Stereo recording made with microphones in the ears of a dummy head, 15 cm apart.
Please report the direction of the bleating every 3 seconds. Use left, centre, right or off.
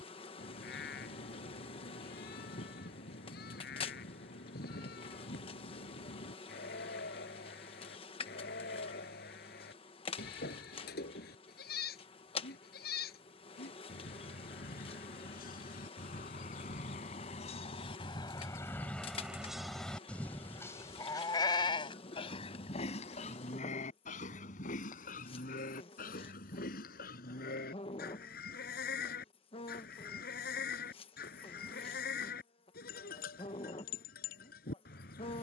left, left, left, left, left, left, centre, left, left, left, left, left.